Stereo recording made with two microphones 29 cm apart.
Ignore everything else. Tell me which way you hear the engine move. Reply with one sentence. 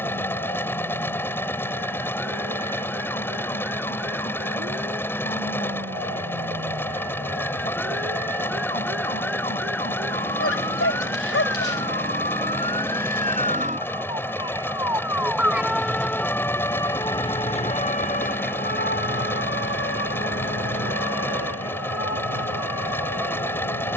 You can hear the engine stay in one place.